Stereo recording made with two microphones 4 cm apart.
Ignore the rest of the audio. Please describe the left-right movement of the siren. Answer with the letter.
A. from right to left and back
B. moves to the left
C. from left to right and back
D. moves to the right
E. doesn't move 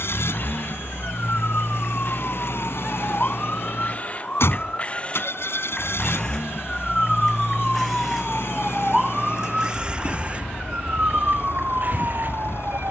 D.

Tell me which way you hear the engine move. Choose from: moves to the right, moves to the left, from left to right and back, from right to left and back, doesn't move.
doesn't move.